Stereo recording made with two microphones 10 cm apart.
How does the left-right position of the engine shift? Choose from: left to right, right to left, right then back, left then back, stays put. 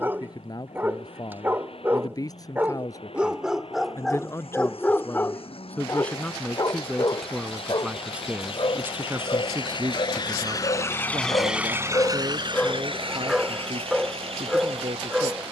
left to right.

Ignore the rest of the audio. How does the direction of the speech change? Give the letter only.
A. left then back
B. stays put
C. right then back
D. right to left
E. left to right
E.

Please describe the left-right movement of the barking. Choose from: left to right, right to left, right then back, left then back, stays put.
left then back.